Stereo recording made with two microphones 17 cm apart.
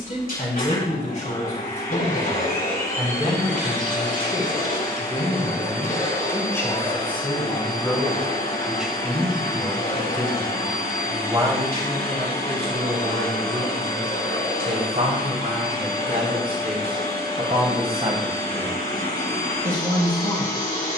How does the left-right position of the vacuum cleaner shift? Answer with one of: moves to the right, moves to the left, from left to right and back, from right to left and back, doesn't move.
doesn't move.